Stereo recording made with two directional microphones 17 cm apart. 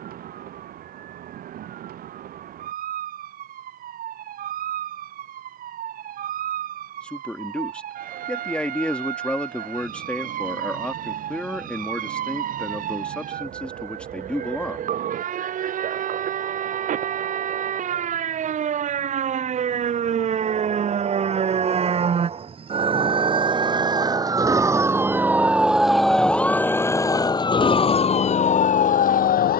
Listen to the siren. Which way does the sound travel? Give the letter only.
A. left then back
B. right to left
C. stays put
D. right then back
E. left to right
B.